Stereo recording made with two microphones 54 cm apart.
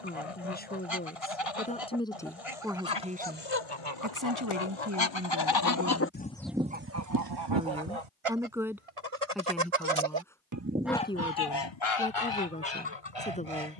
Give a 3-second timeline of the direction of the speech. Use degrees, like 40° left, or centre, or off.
10° left, 30° right, 10° right, 10° left, 10° left.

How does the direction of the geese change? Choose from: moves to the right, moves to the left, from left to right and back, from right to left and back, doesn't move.
from left to right and back.